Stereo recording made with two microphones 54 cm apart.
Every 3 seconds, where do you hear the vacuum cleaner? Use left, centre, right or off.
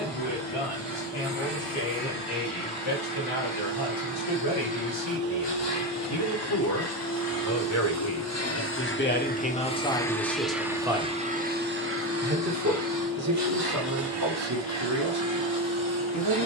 left, left, left, centre, right, right.